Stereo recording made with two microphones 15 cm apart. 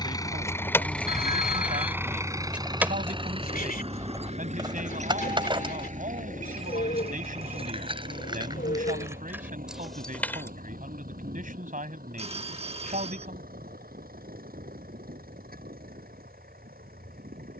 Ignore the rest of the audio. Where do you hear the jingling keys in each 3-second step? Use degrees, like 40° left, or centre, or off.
centre, 20° right, 30° right, centre, off, off.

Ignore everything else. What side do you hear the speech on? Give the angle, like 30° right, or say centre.
60° right.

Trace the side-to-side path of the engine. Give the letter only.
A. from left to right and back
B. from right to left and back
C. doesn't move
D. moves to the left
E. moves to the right
E.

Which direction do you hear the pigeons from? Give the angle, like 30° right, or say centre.
70° left.